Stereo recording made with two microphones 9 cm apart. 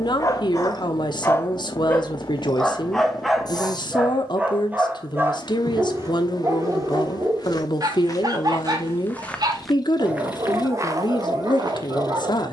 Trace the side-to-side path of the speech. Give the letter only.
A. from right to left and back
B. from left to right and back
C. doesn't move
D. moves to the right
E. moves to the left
C.